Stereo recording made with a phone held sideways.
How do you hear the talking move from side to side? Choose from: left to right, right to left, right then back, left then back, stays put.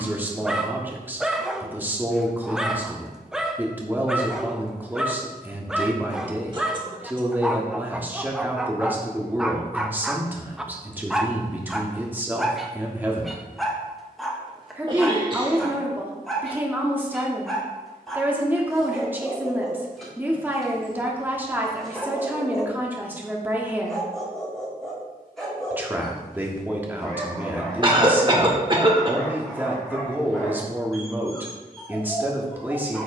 stays put.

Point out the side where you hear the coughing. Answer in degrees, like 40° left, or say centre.
30° right.